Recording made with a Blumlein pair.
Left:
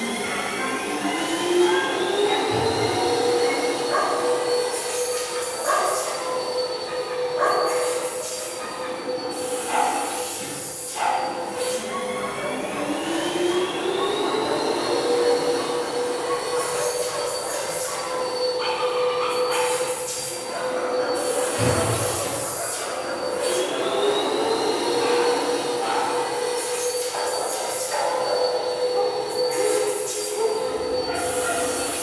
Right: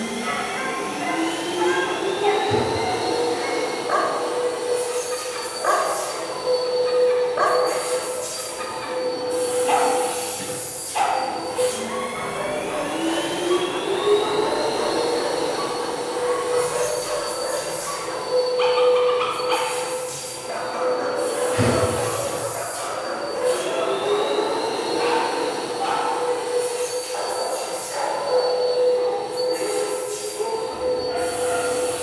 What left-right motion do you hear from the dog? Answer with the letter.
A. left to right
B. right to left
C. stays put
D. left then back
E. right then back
B.